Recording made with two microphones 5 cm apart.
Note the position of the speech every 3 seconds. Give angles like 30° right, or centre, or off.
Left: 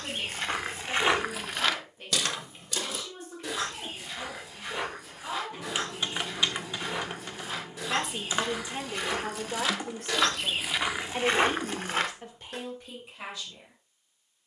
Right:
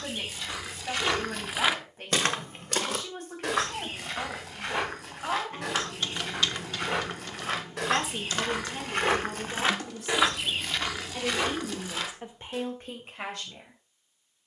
60° right, 60° right, 10° left, 40° left, 40° right.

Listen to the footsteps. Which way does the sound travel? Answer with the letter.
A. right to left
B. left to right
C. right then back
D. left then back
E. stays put
C.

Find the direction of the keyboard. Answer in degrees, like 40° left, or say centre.
20° left.